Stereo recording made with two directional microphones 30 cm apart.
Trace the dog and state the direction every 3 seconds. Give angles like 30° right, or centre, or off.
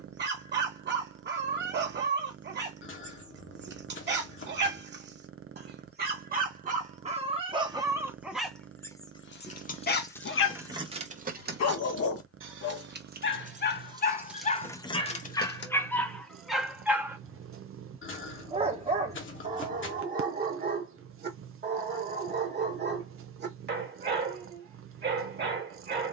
40° right, 40° right, 20° right, 40° left, 30° left, centre, 30° right, 30° right, 30° right.